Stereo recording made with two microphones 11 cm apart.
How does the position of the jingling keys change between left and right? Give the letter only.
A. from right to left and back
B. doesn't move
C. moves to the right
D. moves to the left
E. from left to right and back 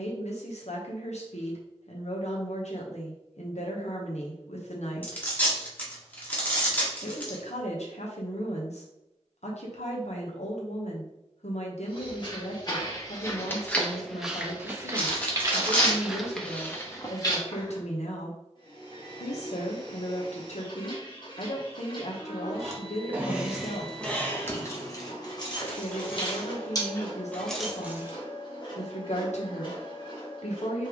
A.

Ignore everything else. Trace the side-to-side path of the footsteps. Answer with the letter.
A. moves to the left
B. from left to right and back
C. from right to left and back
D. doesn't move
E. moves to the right
B.